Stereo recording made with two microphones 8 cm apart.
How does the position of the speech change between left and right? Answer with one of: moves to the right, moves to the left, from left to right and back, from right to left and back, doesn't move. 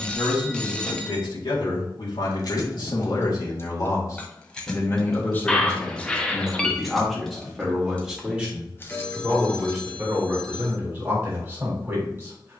moves to the right.